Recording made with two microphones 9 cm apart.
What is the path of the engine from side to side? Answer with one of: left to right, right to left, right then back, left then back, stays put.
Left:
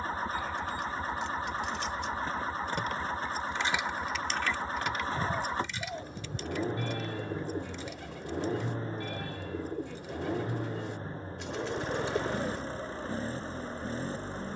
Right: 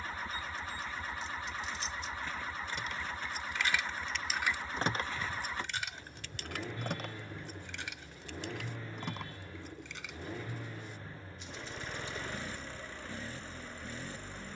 stays put.